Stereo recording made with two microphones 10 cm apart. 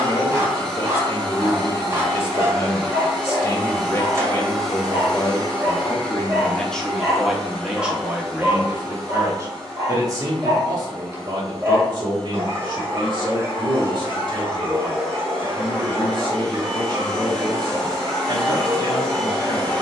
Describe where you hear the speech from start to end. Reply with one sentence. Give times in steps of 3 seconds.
You can hear the speech on the left from 0 s, in the centre from 6 s and on the right from 9 s.